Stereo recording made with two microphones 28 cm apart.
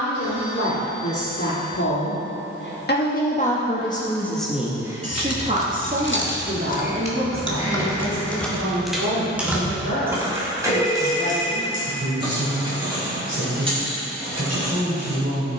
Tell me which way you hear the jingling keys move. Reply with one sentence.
You can hear the jingling keys move to the right.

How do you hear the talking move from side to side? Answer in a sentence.
You can hear the talking move from left to right.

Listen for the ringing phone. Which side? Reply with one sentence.
You can hear the ringing phone on the right.